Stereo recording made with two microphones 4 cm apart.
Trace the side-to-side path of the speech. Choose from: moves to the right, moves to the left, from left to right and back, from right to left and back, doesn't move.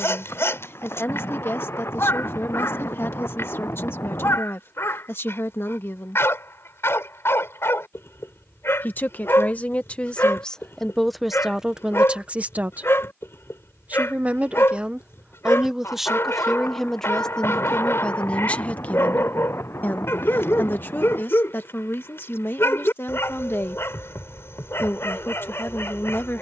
from left to right and back.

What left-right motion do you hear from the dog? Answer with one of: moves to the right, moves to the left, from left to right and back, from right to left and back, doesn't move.
doesn't move.